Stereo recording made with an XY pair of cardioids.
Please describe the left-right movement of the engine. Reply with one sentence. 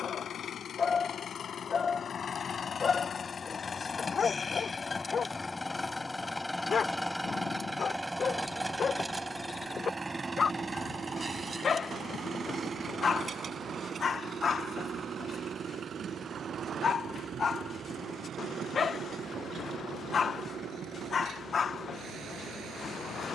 You can hear the engine go from the left side to the right.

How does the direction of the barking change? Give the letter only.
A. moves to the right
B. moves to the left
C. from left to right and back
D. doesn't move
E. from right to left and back
D.